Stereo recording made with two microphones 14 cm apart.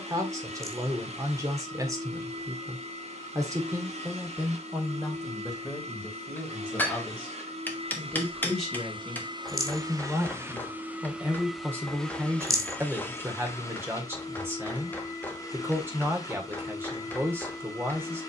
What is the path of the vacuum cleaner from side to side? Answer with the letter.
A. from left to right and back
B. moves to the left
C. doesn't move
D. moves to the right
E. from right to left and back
B.